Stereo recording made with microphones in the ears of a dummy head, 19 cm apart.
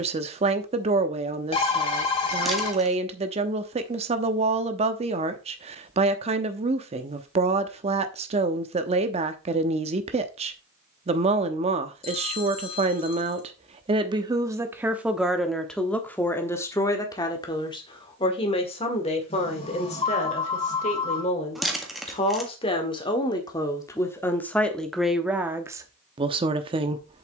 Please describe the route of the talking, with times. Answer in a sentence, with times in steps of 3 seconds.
In this clip you hear the talking on the right from 0 s, in the centre from 15 s, on the left from 18 s and in the centre from 24 s.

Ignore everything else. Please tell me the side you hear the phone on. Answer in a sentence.
In this clip you hear the phone on the left.